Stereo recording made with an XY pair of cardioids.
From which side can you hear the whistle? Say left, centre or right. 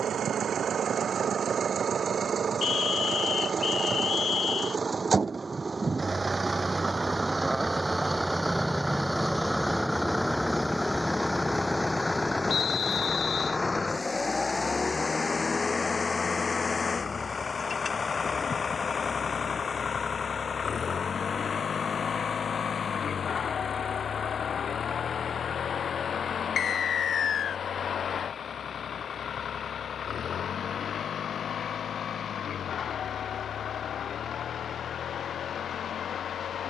left.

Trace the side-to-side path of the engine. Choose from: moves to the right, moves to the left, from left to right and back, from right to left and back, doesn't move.
moves to the left.